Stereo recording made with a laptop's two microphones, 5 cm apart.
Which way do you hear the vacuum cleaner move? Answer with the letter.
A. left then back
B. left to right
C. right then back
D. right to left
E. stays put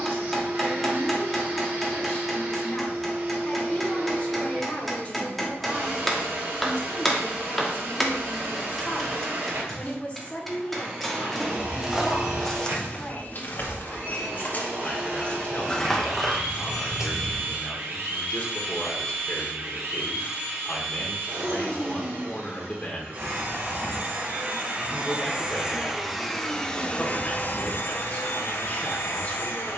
D.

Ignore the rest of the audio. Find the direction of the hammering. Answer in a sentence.
You can hear the hammering in the centre.